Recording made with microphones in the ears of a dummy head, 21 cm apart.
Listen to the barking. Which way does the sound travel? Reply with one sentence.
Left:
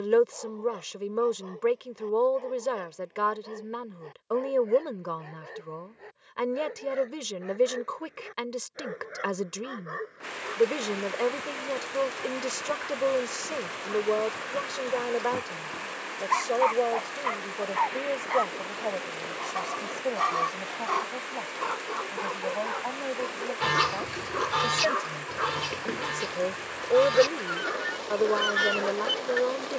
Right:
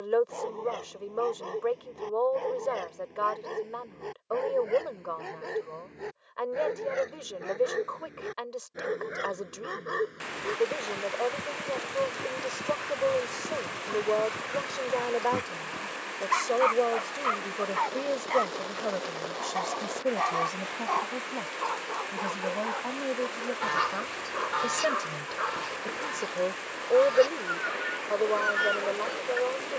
In this clip you hear the barking go from the right side to the left.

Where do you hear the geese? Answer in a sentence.
You can hear the geese on the left.